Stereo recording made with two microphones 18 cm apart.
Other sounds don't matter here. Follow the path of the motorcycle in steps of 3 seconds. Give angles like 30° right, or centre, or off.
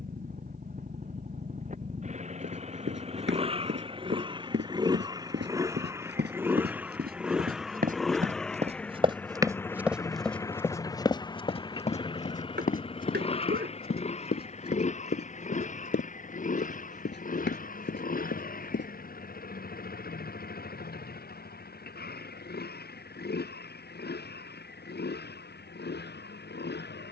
40° right, 20° right, centre, 20° left, 30° left, 40° left, 50° left, 60° left, 60° left.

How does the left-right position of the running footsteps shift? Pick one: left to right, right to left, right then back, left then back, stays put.
right to left.